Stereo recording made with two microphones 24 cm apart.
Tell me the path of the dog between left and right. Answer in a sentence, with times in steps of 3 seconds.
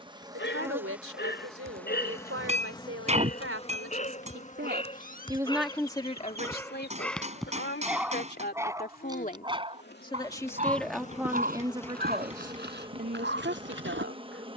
In this clip you hear the dog on the left from 0 s, in the centre from 6 s and on the right from 9 s.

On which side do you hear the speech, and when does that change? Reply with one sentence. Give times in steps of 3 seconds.
You can hear the speech on the right from 0 s, on the left from 6 s, in the centre from 9 s and on the right from 12 s.